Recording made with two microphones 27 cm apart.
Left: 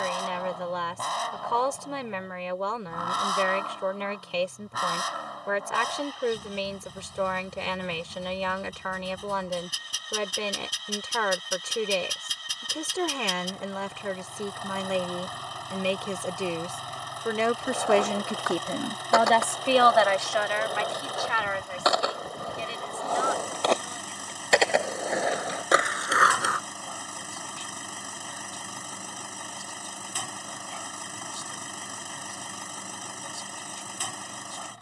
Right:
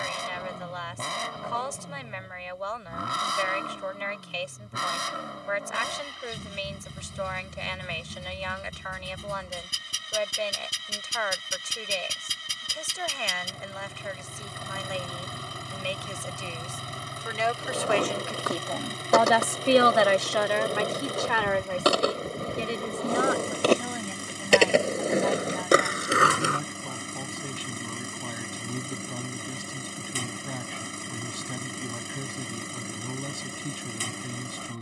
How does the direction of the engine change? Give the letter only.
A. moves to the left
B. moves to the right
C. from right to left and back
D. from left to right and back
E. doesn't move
E.